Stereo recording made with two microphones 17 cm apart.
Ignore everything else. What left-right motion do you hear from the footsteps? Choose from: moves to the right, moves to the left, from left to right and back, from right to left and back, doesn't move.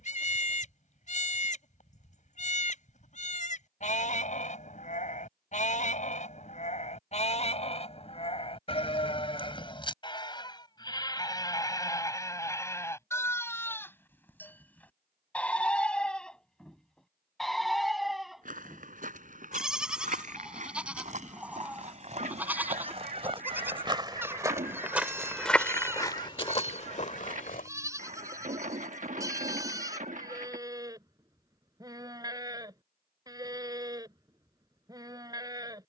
moves to the left.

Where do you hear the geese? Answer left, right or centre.
right.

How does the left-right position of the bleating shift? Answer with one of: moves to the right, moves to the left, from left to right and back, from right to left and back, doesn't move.
moves to the right.